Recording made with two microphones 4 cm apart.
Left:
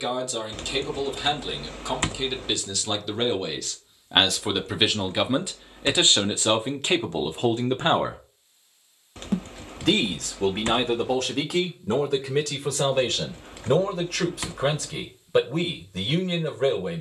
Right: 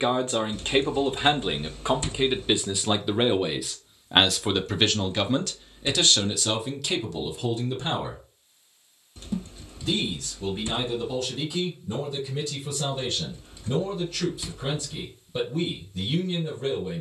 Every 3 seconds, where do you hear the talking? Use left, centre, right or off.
right, centre, left, left, left, left.